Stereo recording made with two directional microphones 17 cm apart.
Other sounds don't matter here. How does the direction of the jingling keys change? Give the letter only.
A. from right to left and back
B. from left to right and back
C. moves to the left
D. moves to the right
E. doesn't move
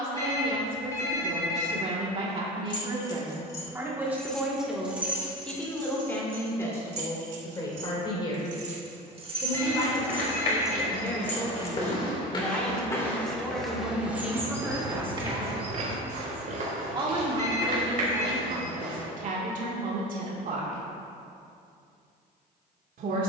B.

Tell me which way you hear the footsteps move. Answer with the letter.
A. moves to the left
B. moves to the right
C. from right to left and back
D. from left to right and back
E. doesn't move
B.